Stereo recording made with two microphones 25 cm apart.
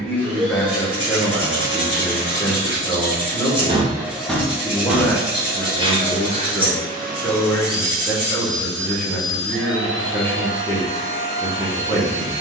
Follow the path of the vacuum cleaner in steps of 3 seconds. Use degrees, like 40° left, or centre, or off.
50° right, 10° right, 40° right, 50° right.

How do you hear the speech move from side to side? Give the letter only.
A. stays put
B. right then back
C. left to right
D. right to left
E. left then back
A.